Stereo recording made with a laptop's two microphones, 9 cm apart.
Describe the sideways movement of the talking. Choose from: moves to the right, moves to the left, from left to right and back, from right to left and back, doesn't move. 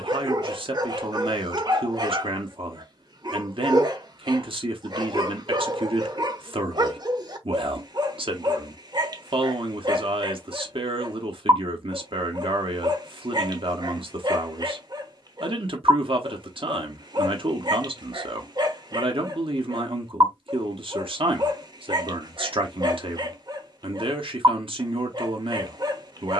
doesn't move.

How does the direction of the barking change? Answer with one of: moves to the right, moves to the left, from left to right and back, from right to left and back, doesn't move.
doesn't move.